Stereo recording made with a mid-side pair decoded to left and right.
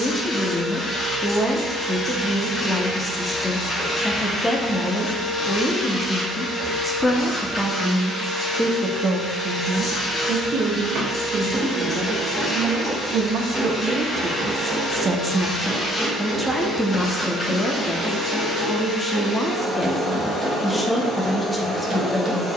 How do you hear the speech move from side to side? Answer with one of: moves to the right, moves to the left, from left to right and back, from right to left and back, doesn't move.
from left to right and back.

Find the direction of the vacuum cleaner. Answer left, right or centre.
left.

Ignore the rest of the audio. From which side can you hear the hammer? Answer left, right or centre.
right.